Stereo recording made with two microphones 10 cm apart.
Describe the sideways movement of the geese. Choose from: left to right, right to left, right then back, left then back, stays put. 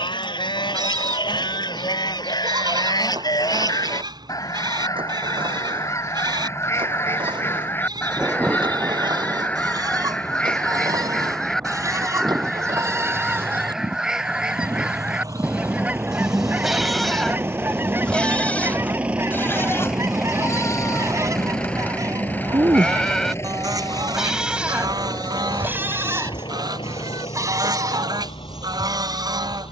left to right.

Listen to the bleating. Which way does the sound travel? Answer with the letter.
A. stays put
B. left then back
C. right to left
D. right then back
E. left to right
B.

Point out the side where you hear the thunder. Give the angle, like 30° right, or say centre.
20° right.